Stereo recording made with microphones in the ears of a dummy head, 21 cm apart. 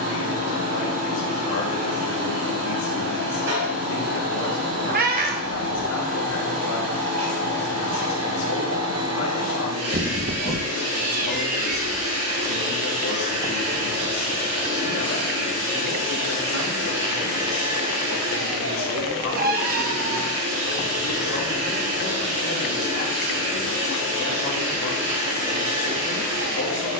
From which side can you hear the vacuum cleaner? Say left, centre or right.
right.